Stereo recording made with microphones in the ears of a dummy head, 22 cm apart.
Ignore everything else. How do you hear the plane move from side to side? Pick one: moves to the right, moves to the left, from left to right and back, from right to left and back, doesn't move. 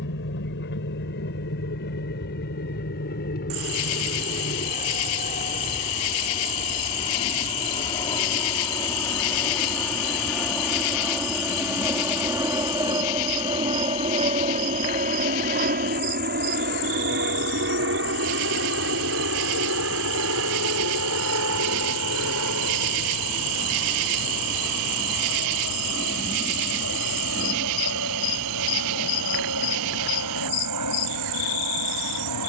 moves to the right.